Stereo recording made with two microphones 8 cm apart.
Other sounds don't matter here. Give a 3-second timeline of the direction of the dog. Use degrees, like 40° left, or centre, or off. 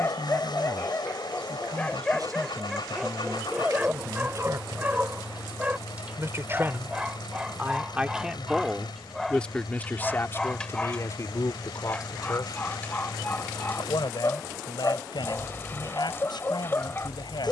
20° left, 20° right, 10° right, 10° left, 30° left, 30° left.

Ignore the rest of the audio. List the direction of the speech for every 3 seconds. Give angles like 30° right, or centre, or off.
60° right, 50° right, 20° right, 30° left, 70° left, 80° left.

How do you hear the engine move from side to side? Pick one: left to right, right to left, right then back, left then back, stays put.
stays put.